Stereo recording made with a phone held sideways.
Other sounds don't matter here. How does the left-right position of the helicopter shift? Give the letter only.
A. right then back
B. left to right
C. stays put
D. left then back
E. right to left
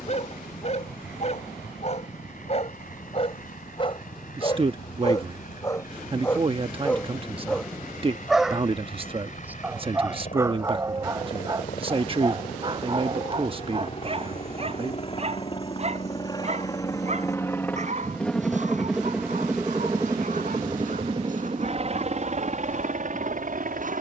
B.